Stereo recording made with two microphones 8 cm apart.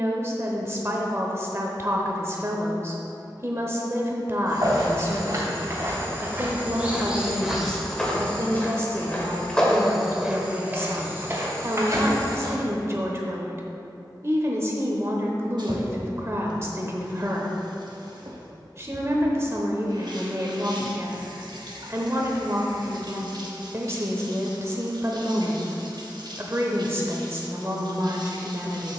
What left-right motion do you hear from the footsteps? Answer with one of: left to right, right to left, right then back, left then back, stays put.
left then back.